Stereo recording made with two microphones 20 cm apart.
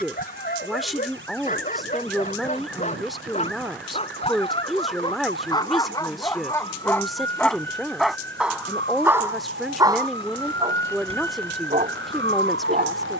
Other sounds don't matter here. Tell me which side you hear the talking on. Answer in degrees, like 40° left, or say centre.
centre.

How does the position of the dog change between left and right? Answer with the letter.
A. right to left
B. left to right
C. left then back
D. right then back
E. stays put
B.